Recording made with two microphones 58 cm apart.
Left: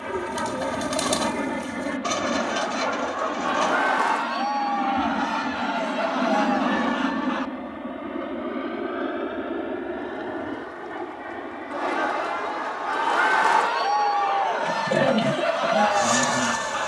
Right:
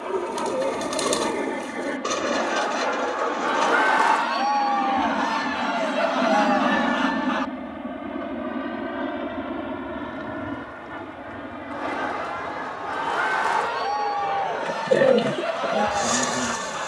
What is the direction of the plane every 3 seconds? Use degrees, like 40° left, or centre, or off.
40° left, 10° left, 10° right, 30° right, 40° right, 50° right.